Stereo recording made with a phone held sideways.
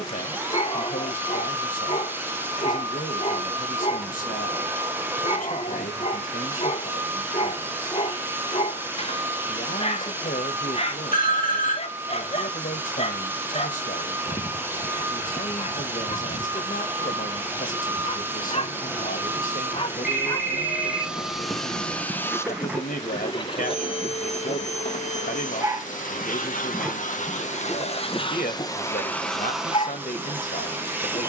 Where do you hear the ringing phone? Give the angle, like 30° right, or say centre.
70° left.